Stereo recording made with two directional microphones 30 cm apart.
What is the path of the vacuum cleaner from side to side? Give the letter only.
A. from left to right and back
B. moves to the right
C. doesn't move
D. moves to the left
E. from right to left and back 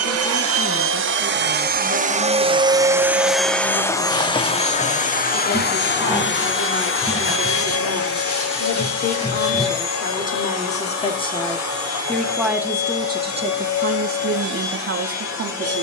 D.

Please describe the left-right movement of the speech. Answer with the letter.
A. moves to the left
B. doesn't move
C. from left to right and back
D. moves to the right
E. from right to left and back
D.